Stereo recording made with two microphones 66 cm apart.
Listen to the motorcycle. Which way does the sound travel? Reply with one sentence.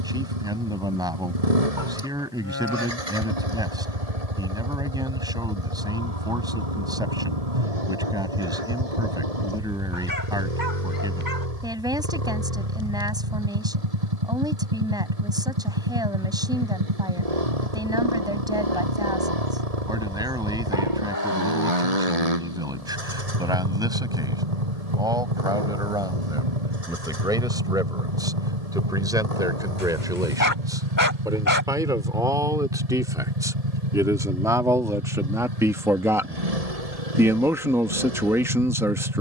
You can hear the motorcycle stay put.